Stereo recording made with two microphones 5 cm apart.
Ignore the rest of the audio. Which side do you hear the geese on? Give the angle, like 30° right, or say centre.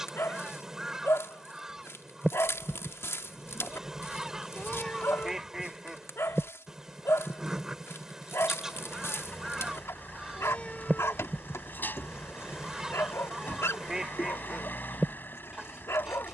10° right.